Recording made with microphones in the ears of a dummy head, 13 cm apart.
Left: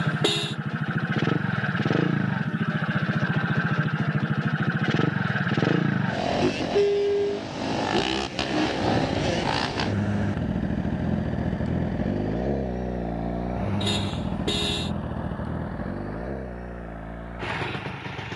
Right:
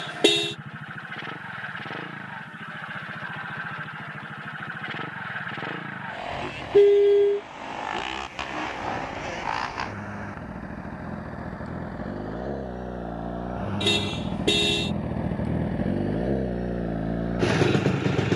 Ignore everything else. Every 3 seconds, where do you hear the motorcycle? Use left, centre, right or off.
left, left, left, left, centre, right.